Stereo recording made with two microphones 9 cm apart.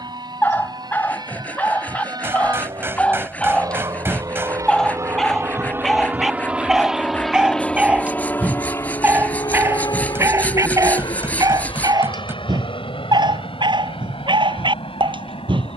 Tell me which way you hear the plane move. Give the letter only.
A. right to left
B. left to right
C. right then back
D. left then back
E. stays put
A.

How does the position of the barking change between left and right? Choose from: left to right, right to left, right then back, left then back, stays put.
left to right.